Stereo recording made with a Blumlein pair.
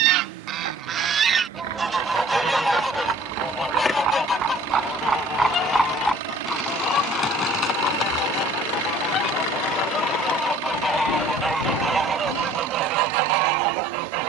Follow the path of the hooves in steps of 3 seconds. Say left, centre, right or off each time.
right, right, left, left, left.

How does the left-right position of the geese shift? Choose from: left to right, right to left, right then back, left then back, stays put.
left then back.